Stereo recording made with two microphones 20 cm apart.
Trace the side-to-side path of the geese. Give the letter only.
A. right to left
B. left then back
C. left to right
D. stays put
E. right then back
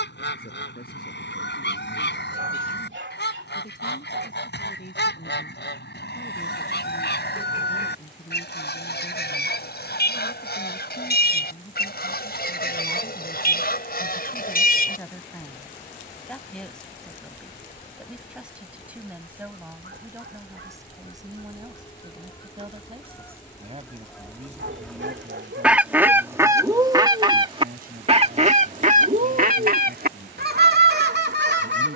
C.